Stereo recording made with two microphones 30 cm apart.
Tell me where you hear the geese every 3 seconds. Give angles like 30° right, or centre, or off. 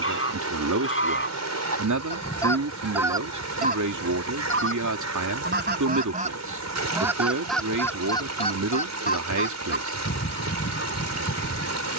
30° left, 30° right, centre, 40° left.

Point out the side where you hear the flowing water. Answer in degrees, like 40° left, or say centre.
60° right.